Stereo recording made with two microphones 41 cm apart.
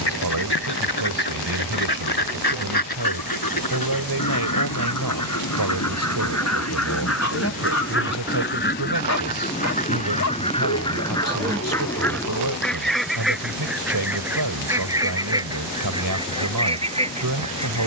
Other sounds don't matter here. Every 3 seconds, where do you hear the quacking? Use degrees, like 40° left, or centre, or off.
70° left, 50° left, 30° left, 10° left, centre, 10° right.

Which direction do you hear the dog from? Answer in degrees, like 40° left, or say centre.
40° left.